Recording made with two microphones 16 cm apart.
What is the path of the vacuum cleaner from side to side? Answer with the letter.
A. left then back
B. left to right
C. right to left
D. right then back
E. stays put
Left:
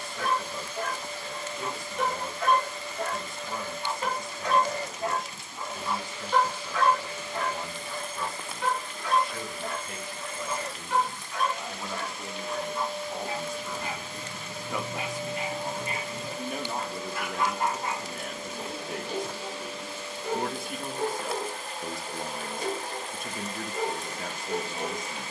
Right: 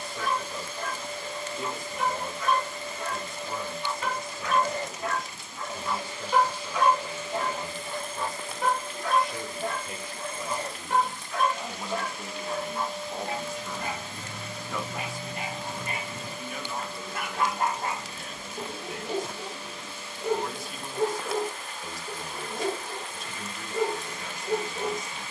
C.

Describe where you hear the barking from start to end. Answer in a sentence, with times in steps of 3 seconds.
In this clip you hear the barking on the left from 0 s and on the right from 6 s.